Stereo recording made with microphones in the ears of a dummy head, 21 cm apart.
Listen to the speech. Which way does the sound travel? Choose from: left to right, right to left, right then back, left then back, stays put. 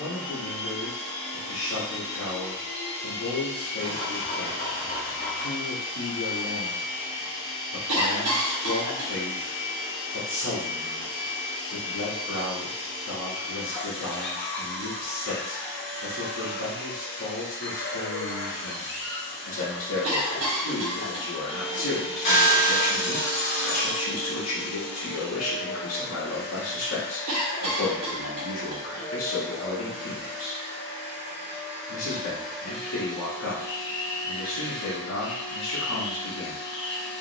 stays put.